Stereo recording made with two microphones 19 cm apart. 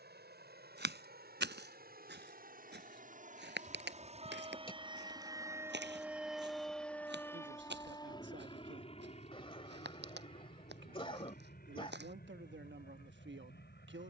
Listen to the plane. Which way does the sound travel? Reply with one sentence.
You can hear the plane go from the right side to the left.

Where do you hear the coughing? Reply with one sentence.
In this clip you hear the coughing on the left.